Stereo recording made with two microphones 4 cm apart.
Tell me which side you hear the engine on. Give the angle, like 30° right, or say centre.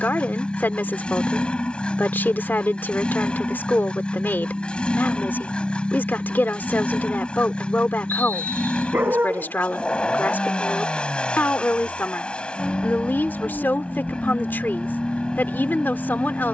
30° left.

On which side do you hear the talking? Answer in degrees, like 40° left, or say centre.
60° left.